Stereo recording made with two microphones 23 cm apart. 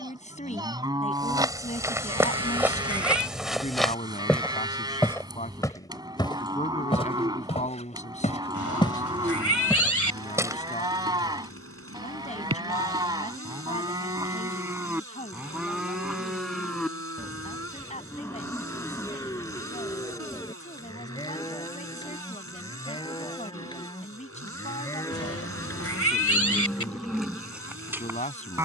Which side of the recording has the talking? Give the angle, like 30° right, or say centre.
30° left.